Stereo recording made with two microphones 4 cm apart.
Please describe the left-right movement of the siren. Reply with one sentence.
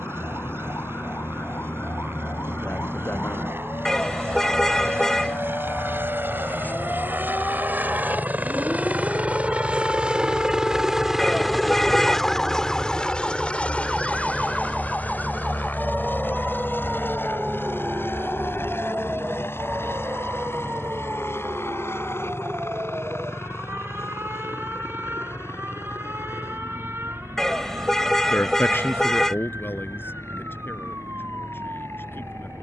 You can hear the siren go from the left side to the right.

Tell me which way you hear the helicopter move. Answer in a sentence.
In this clip you hear the helicopter move to the left.